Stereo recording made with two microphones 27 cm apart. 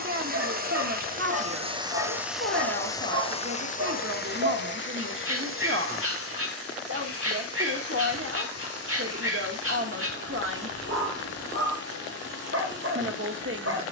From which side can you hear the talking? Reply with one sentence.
You can hear the talking on the right.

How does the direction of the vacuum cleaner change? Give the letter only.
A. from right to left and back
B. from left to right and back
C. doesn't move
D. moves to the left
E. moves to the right
D.